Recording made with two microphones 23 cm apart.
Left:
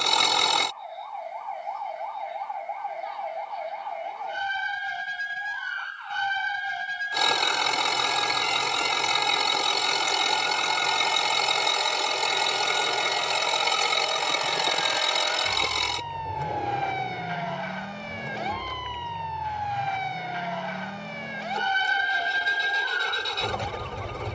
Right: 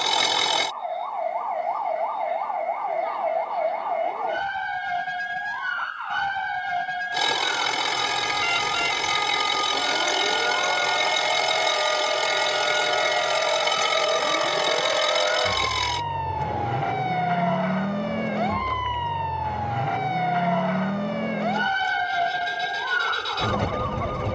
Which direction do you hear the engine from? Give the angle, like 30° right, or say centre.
centre.